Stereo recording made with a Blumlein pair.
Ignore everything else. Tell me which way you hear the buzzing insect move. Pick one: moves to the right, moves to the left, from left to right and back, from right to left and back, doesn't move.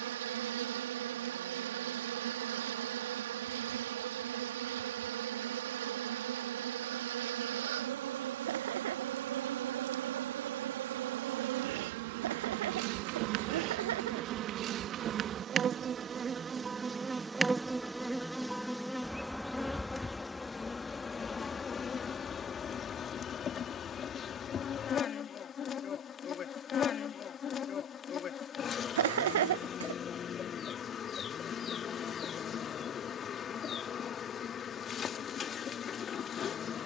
moves to the left.